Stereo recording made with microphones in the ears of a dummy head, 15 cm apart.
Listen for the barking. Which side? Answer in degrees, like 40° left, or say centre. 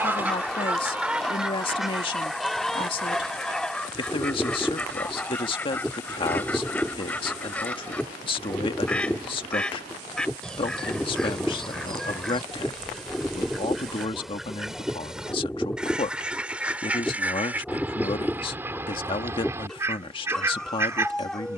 centre.